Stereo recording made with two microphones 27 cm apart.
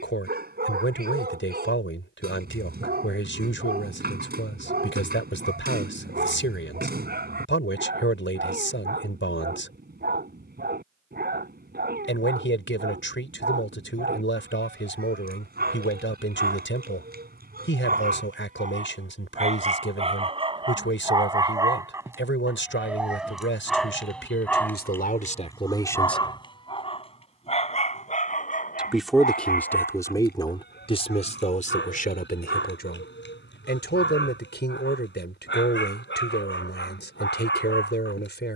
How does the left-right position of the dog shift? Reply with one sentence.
In this clip you hear the dog travel towards the left.